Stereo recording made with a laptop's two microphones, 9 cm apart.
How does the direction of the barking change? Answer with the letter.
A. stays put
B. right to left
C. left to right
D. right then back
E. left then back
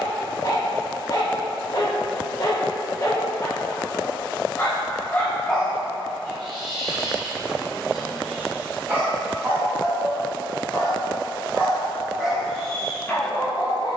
D.